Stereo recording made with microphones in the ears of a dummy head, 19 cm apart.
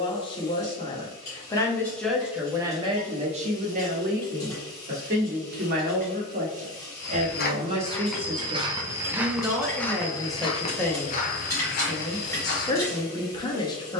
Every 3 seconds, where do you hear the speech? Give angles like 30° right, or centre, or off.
10° left, 40° right, 30° right, centre, 20° left.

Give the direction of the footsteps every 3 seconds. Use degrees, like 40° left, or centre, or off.
off, off, 10° left, 20° left, 60° left.